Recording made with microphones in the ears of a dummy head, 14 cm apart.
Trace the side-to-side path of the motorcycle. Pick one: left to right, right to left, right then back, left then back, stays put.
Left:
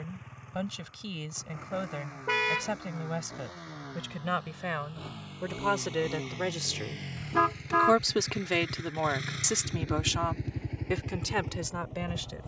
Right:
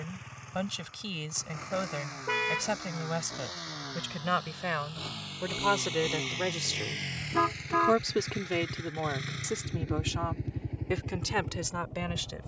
right to left.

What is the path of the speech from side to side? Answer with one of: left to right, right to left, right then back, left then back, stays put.
left then back.